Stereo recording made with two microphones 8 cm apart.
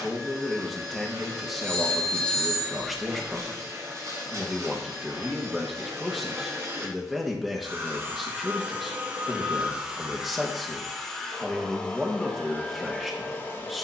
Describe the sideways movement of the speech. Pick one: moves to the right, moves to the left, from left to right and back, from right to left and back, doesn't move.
doesn't move.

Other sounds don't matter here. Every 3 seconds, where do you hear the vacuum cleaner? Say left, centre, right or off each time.
right, right, right, centre, left.